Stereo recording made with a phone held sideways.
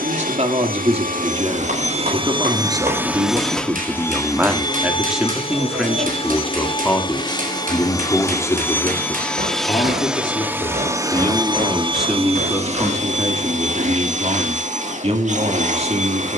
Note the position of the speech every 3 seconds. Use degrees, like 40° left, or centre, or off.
30° right, 10° right, 10° left, 20° left, 30° right, 40° right.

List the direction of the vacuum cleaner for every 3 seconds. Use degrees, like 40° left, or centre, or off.
40° right, 20° left, 20° left, 10° right, 50° right, 50° right.